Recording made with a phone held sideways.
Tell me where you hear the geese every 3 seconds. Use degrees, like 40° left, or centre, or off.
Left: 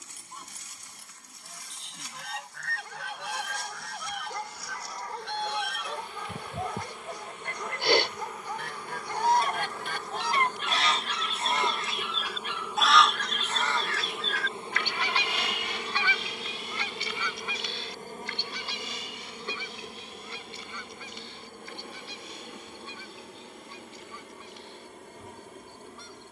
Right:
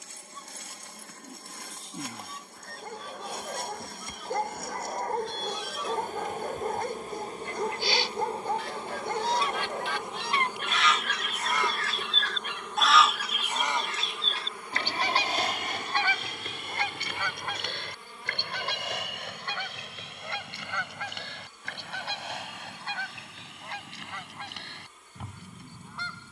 80° left, 70° left, 60° left, 40° left, 10° right, 50° right, 70° right, 70° right, 80° right.